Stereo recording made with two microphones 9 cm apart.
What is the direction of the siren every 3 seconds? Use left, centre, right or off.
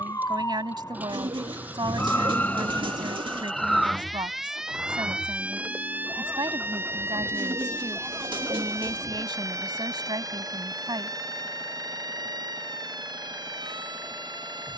left, centre, right, right, right.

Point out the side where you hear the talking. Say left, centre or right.
right.